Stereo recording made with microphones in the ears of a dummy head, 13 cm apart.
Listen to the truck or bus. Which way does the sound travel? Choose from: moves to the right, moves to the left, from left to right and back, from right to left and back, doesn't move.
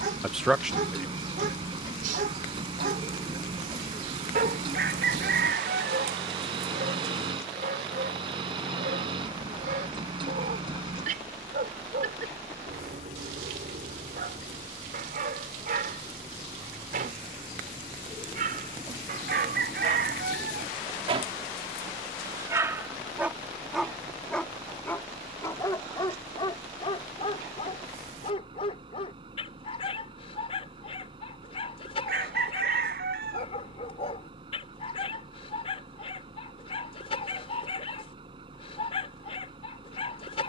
doesn't move.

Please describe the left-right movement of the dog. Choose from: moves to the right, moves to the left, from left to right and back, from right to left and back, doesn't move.
moves to the left.